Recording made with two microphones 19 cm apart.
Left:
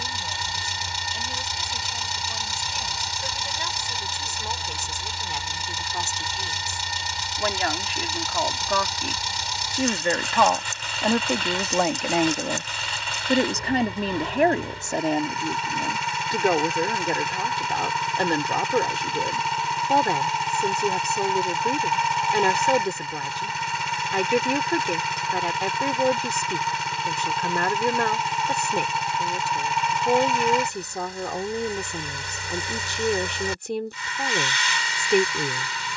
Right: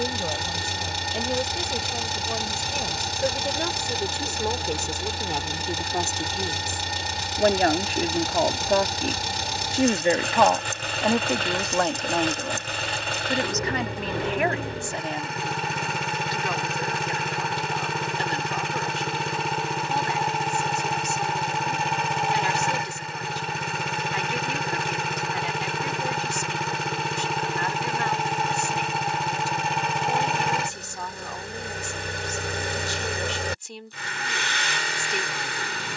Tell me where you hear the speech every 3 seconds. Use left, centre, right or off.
right, right, right, centre, left, left, left, left, left, left, left, left.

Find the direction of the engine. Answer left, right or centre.
right.